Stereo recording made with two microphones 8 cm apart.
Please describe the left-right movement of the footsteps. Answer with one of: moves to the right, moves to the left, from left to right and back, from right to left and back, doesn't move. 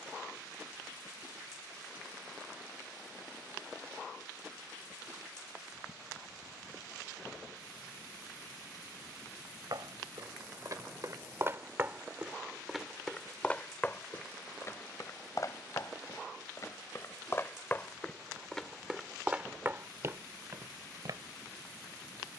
from right to left and back.